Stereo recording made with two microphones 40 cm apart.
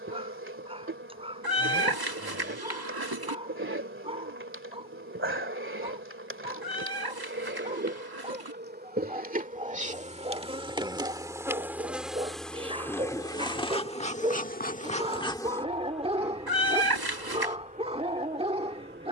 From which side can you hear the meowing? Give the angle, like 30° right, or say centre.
60° right.